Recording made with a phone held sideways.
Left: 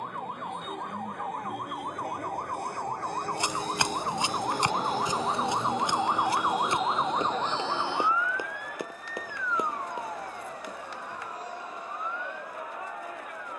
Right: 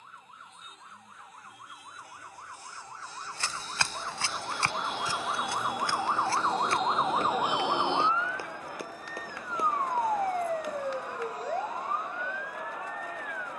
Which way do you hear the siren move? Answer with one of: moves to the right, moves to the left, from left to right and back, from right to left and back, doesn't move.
moves to the right.